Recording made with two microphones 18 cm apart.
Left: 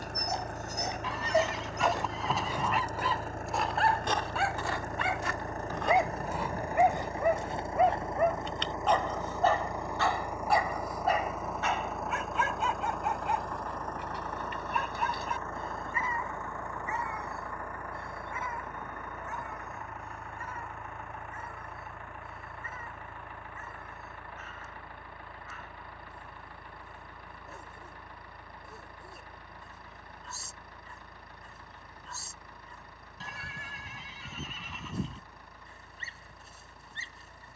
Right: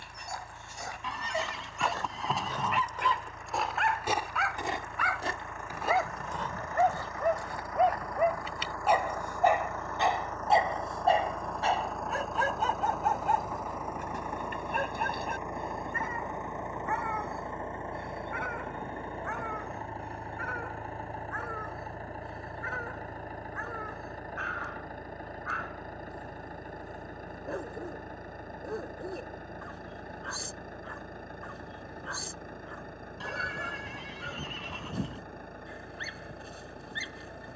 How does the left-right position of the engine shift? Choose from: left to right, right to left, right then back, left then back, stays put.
left to right.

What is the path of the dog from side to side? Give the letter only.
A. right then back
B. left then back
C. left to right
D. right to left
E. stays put
C.